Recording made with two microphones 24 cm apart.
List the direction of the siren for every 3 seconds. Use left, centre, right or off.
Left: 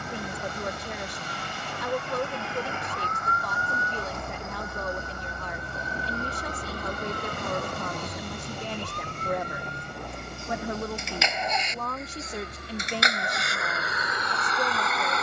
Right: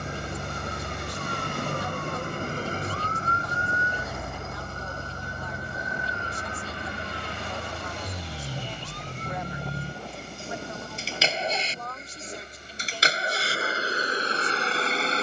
right, centre, left, left, left.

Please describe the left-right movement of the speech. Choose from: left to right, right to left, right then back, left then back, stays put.
stays put.